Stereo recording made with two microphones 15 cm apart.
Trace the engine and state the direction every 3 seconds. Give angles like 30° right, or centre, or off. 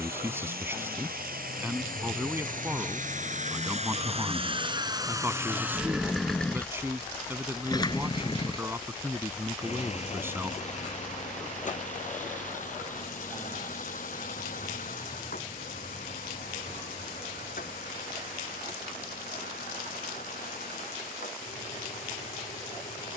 70° right, 30° right, 20° left, 50° left, 60° left, 60° left, 70° left, 70° left.